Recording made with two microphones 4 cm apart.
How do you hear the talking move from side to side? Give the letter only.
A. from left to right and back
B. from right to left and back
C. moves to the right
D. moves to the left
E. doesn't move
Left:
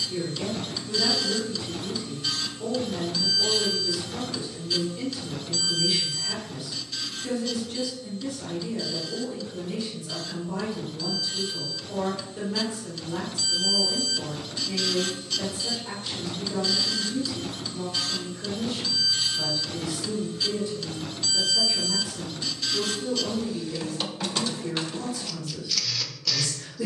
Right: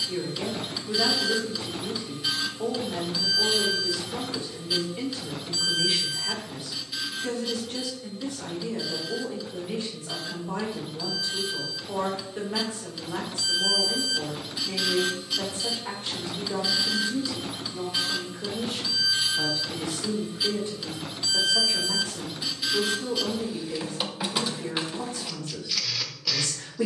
E.